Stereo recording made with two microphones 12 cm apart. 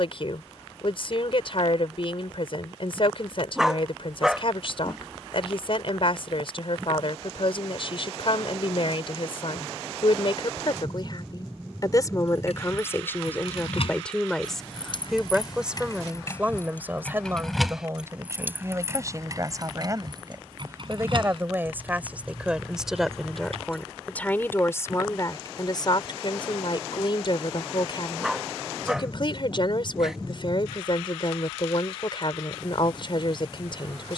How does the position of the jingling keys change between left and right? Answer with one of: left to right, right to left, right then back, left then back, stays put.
left to right.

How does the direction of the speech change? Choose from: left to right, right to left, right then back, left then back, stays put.
right then back.